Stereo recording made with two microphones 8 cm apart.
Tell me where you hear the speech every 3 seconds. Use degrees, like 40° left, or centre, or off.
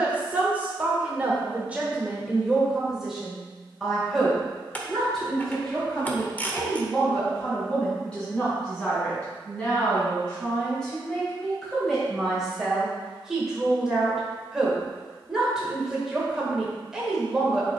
10° right, centre, 10° left, 10° left, 10° right, 10° right.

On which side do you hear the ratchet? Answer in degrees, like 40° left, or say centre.
20° left.